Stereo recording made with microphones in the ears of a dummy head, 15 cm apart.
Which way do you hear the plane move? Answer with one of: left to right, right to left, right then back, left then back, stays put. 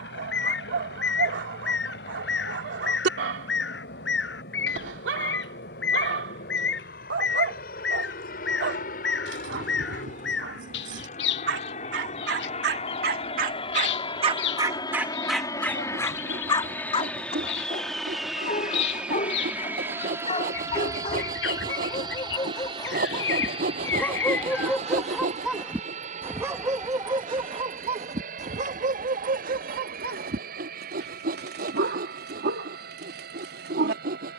left to right.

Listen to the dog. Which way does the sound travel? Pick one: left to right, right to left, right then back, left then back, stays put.
left then back.